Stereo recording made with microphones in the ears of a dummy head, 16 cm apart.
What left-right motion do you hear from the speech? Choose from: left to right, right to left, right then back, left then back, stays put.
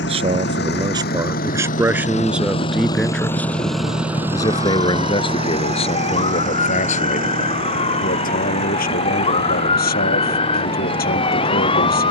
right to left.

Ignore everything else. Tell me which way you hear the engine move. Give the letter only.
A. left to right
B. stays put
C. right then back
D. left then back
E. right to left
A.